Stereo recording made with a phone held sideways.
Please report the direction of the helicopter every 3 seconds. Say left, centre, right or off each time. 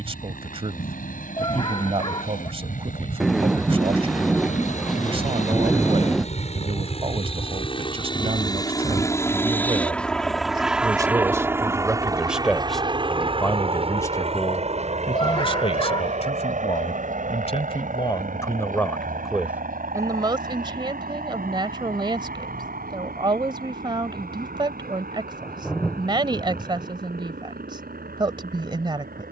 left, left, left, centre, right, right, right, right, right, right.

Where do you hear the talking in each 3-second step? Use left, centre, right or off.
right, right, right, right, centre, left, centre, right, right, right.